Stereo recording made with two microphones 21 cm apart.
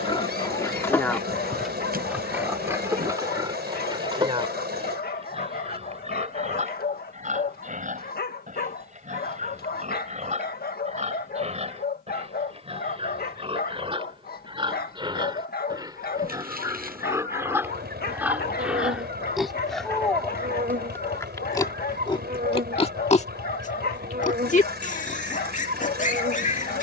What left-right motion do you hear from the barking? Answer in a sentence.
You can hear the barking stay in one place.